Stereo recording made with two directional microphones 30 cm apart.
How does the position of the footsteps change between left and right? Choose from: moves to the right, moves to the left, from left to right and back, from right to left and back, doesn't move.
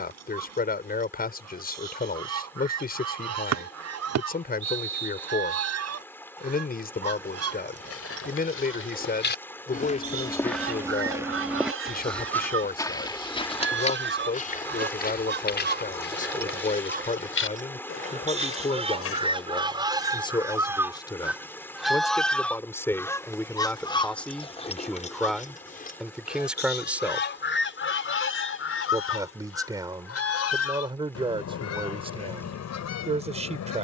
from left to right and back.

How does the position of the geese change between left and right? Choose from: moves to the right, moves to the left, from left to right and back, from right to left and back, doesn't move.
moves to the left.